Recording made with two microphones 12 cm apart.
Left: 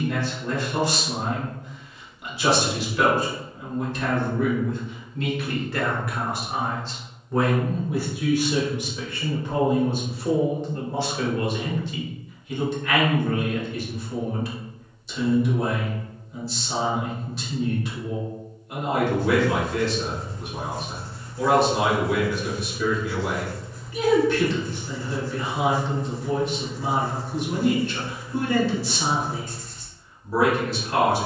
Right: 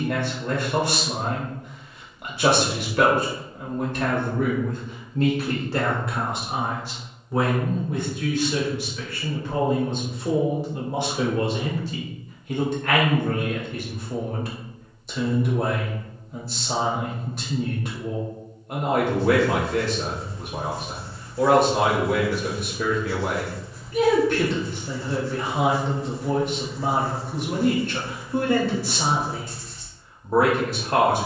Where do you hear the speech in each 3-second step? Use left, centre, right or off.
right, right, centre, centre, right, right, right, right, right, right, right.